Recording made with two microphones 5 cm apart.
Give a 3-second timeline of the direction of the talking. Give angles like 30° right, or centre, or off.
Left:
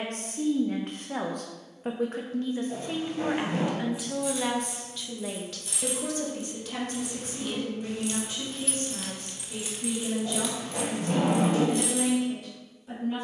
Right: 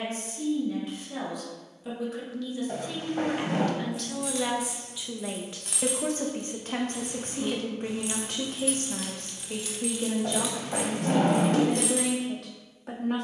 50° left, centre, 50° right, 60° right, 60° right.